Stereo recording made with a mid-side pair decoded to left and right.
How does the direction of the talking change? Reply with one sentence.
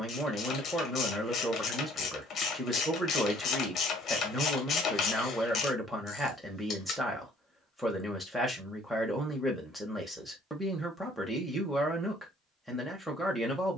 In this clip you hear the talking stay put.